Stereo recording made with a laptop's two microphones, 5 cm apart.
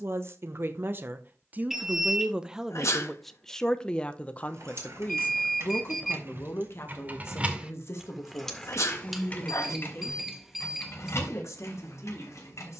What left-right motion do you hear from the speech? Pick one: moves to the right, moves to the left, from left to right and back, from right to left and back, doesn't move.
moves to the left.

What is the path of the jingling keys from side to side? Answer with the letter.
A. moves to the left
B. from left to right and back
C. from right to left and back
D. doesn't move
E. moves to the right
A.